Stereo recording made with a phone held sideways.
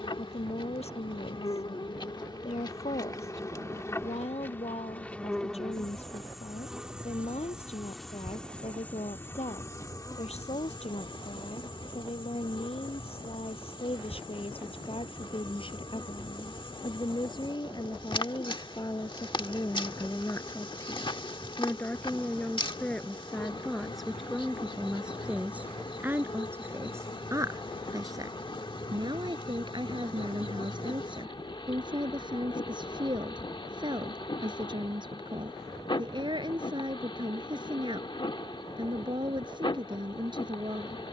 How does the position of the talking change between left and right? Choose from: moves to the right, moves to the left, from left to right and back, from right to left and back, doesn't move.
moves to the right.